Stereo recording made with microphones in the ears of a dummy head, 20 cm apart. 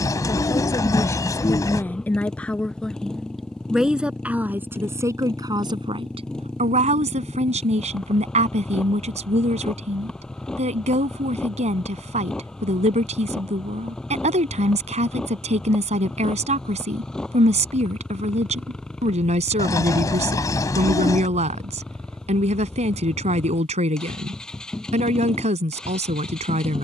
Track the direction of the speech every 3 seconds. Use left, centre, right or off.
centre, centre, right, right, right, right, right, right, right.